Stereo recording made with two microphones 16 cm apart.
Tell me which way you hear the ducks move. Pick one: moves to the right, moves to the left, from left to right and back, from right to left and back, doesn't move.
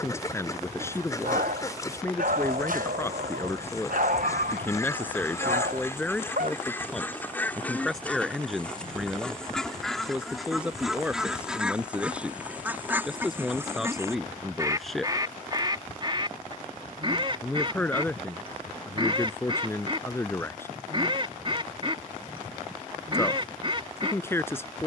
moves to the right.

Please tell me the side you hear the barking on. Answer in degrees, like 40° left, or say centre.
70° right.